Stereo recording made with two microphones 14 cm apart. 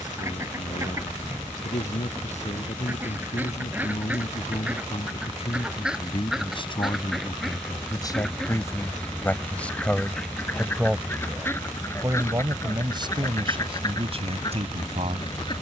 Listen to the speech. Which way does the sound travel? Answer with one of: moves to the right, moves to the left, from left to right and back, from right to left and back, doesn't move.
moves to the right.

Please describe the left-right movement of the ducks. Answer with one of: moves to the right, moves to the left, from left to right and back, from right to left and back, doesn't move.
moves to the left.